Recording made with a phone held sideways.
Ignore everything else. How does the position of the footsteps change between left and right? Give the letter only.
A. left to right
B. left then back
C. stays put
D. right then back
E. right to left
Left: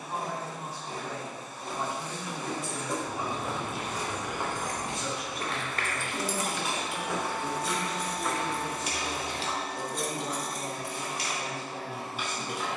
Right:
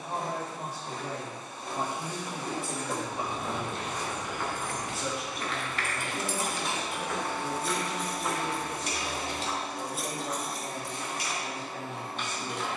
B.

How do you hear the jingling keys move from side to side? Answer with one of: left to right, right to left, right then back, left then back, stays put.
right then back.